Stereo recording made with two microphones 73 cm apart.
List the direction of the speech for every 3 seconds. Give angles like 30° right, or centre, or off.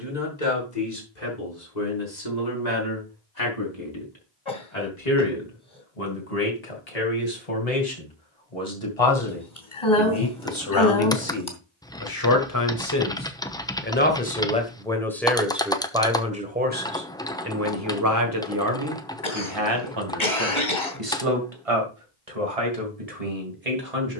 70° left, 60° left, 50° left, 40° left, 20° left, 10° right, 30° right, 50° right.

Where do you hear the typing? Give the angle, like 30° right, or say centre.
10° left.